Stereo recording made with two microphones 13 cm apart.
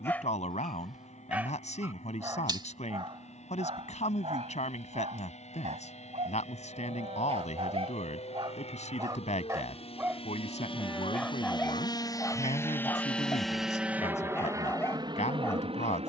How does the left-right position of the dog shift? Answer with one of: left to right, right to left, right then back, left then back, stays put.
right then back.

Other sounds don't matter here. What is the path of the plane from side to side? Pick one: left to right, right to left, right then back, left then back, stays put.
left to right.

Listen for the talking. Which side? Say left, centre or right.
left.